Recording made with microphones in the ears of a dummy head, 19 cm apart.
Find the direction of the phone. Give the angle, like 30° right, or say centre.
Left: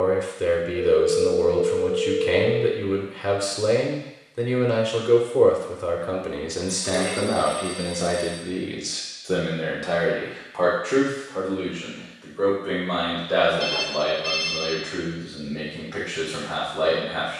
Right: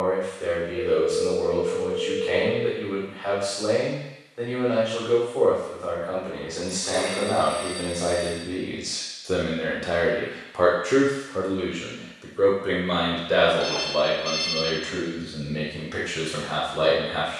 10° left.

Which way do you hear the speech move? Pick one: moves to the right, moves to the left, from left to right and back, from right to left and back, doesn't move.
moves to the right.